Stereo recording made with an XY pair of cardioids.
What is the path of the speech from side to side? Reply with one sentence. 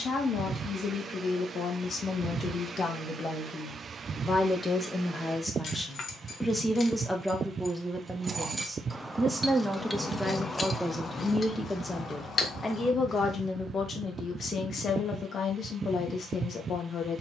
You can hear the speech go right and come back.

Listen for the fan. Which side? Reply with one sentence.
In this clip you hear the fan on the right.